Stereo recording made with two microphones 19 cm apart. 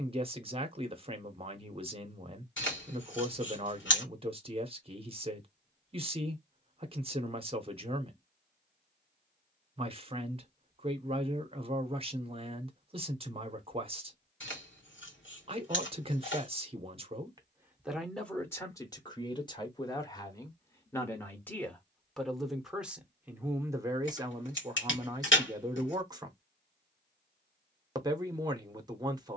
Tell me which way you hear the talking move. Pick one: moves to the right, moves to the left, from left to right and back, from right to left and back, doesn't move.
from right to left and back.